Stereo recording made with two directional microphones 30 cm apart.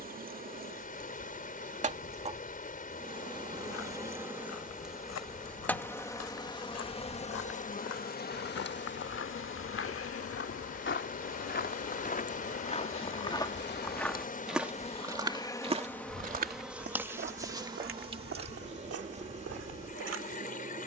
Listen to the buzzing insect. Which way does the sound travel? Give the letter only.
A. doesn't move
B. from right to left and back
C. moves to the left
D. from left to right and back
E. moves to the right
B.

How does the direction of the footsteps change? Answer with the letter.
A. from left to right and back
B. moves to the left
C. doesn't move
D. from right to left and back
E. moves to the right
E.